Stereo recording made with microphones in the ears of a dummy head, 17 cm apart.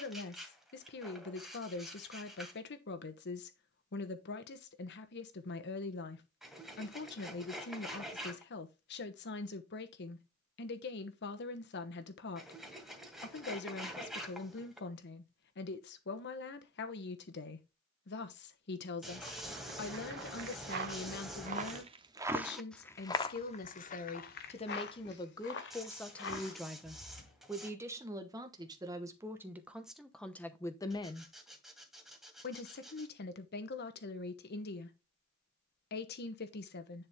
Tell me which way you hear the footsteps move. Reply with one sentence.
In this clip you hear the footsteps go from the right side to the left.